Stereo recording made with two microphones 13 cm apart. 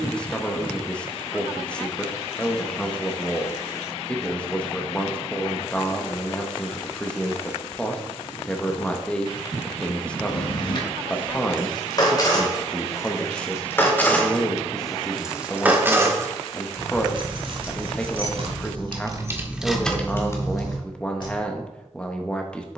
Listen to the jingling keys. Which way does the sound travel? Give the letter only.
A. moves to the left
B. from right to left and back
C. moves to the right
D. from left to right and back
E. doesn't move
D.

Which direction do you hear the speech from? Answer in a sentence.
You can hear the speech in the centre.